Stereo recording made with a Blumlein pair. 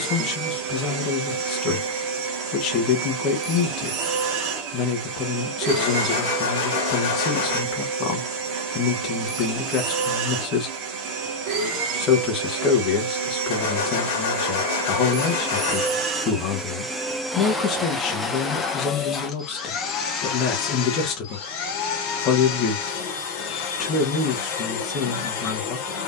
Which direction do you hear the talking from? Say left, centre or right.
left.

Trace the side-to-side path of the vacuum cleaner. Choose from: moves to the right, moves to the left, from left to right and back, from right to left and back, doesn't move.
moves to the left.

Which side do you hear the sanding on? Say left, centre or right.
left.